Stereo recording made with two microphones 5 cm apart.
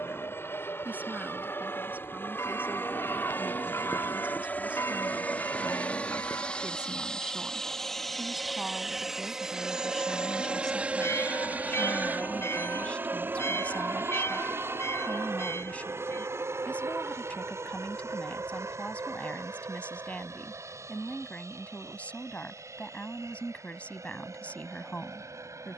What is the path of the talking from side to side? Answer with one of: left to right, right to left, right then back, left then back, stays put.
right to left.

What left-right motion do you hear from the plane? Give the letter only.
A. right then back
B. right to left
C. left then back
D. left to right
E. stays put
D.